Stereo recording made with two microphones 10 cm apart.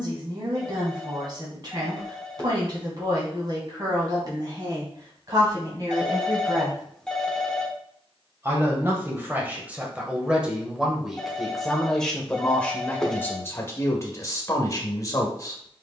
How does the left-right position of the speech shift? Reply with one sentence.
You can hear the speech go from the right side to the left.